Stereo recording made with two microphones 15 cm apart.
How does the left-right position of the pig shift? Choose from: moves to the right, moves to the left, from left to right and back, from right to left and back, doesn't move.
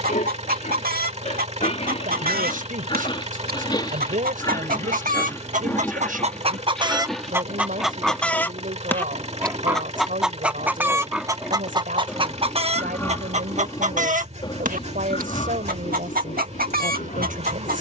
from left to right and back.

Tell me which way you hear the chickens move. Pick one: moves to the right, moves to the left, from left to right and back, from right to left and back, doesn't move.
from right to left and back.